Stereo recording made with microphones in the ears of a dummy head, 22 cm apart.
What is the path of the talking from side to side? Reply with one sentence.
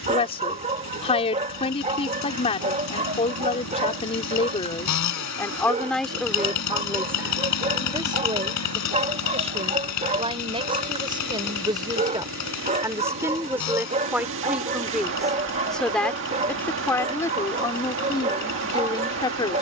You can hear the talking go right and come back.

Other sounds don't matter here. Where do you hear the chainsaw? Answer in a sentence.
You can hear the chainsaw on the left.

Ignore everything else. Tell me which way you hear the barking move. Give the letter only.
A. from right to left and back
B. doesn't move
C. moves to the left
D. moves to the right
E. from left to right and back
B.